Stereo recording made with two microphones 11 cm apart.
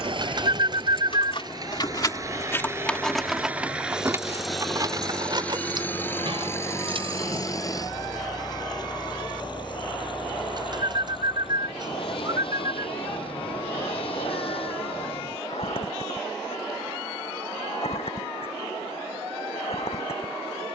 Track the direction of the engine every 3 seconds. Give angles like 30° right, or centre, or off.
40° right, centre, 30° left, 50° left, 60° left, 60° left, 60° left.